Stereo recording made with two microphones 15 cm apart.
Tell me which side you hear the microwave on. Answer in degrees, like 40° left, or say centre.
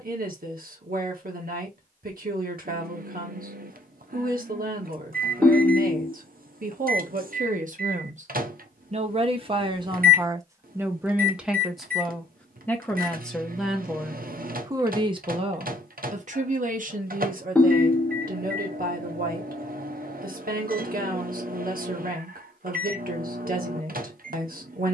70° right.